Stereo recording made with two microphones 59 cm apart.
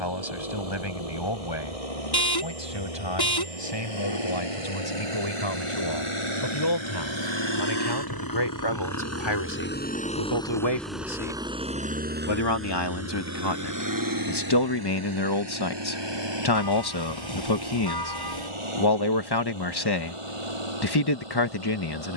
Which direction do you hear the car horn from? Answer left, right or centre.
left.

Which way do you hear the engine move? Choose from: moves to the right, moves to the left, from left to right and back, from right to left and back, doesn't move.
moves to the right.